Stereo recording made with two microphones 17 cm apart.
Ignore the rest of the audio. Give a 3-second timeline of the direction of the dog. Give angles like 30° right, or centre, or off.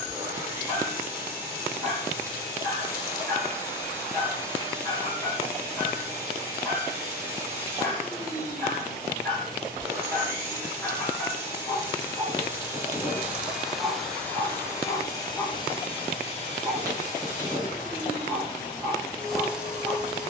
20° left, 20° left, 20° left, 10° left, 10° right, 10° left, 10° left.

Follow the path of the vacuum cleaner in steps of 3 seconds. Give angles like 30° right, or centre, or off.
10° right, 10° right, 10° right, 10° right, centre, 40° left, 10° left.